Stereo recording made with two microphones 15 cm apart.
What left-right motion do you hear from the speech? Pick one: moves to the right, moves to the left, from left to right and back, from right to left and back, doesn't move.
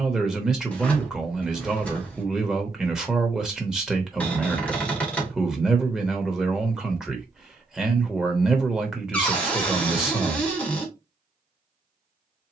doesn't move.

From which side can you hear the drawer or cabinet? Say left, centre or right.
centre.